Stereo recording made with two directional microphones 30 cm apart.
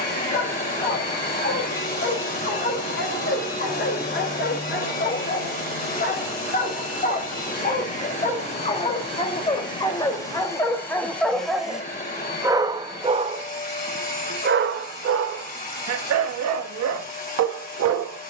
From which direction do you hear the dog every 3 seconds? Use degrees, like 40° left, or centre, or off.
40° left, 40° left, 30° left, 10° left, 30° right, 60° right.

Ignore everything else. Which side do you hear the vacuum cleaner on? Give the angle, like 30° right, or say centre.
30° left.